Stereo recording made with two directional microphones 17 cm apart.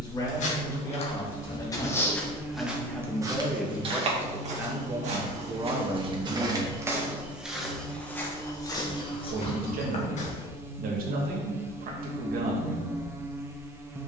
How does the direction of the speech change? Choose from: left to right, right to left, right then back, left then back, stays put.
left to right.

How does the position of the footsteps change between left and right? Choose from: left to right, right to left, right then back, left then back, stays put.
right then back.